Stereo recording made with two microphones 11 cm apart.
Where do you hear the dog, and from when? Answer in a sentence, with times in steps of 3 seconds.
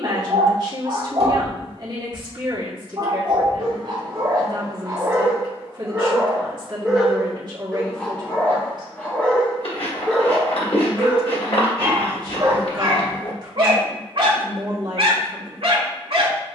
You can hear the dog on the right from 0 s, in the centre from 6 s and on the right from 12 s.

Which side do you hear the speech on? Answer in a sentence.
In this clip you hear the speech on the right.